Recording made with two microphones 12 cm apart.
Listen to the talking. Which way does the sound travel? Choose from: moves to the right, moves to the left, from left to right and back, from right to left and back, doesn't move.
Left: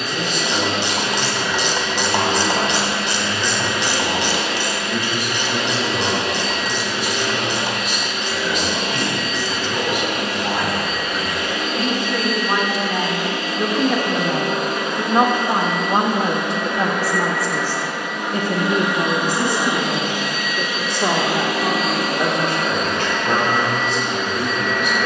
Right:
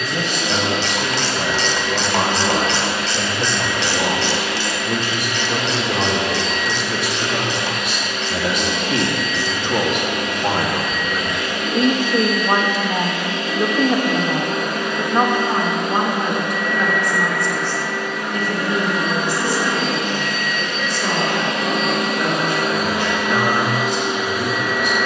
moves to the left.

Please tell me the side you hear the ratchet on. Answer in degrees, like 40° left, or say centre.
20° left.